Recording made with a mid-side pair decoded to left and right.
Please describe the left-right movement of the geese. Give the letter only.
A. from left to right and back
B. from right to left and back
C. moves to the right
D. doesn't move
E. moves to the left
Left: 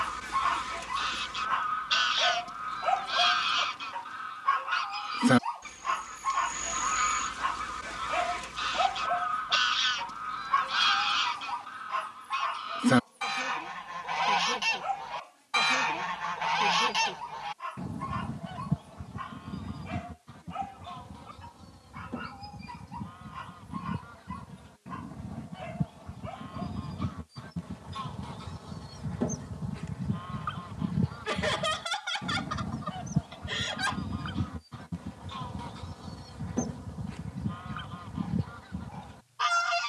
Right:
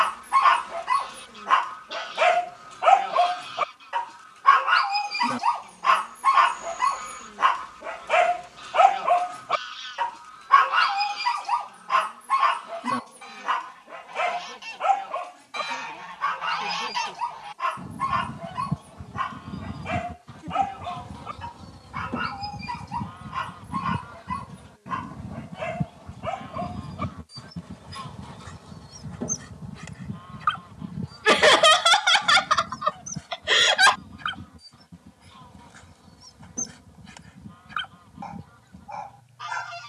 A.